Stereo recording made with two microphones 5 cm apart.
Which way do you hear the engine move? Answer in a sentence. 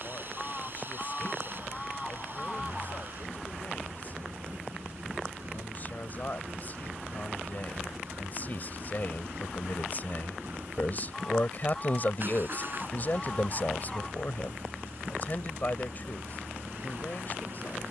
You can hear the engine stay in one place.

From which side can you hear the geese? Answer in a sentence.
In this clip you hear the geese in the centre.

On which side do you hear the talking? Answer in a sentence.
You can hear the talking on the left.